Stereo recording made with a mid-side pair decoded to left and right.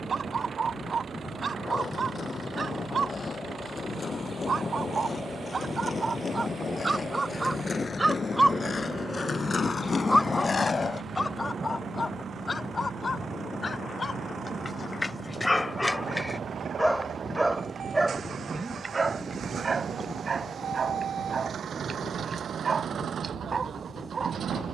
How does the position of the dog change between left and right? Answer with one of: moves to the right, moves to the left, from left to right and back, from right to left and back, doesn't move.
from right to left and back.